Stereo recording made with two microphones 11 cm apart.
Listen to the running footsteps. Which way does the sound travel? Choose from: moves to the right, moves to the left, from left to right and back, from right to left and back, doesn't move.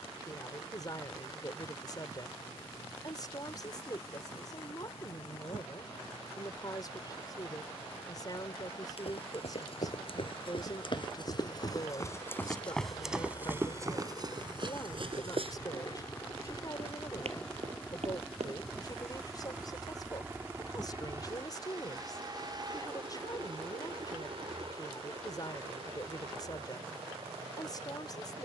moves to the right.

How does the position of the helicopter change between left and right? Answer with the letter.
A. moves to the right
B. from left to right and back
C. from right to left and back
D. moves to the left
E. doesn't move
A.